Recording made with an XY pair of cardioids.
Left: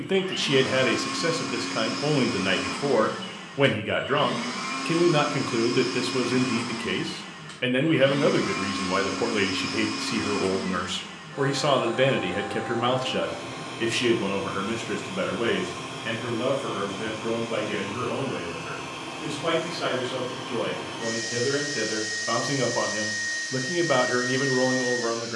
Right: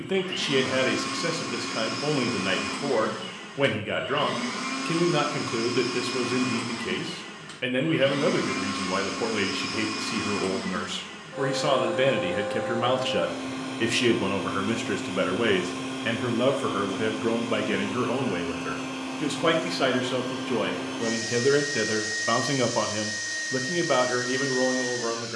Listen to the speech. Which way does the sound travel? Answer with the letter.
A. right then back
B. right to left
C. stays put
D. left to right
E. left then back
A.